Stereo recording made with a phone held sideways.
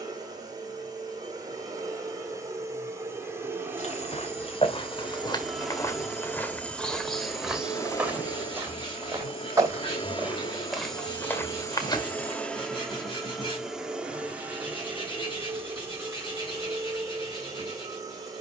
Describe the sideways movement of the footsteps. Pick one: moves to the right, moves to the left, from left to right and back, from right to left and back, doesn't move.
from left to right and back.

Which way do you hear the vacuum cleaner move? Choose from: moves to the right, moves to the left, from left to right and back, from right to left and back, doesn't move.
from right to left and back.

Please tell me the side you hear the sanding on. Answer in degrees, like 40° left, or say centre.
40° left.